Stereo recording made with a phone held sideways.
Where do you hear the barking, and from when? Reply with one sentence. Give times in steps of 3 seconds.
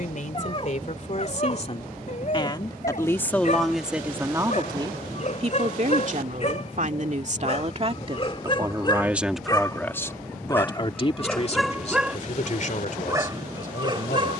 You can hear the barking on the left from 0 s, in the centre from 9 s and on the right from 12 s.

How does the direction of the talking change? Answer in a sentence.
You can hear the talking move from left to right and back again.